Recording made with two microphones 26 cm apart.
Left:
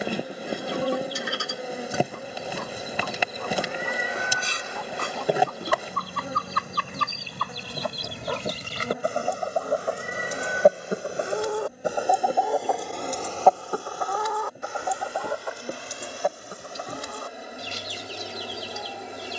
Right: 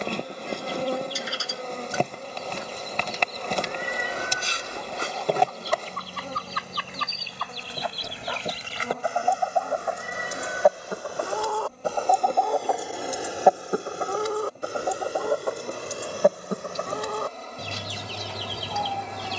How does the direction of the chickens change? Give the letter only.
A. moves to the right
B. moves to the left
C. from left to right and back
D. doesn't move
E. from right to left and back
A.